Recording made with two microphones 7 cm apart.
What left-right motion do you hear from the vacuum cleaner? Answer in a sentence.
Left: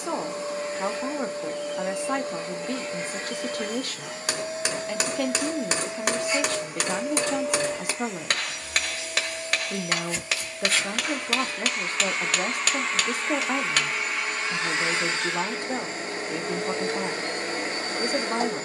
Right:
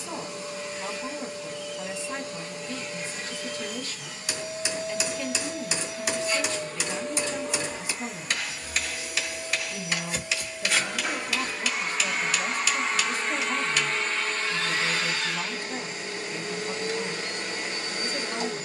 You can hear the vacuum cleaner go right and come back.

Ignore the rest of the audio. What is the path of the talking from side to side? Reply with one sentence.
In this clip you hear the talking stay in one place.